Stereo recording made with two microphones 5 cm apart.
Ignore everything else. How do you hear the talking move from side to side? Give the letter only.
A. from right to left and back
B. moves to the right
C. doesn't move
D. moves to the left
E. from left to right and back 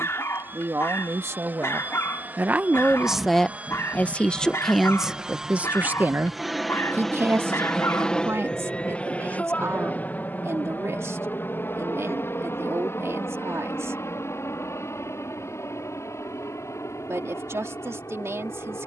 A.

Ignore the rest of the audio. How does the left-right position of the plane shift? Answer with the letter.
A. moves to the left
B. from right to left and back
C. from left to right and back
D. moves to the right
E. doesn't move
A.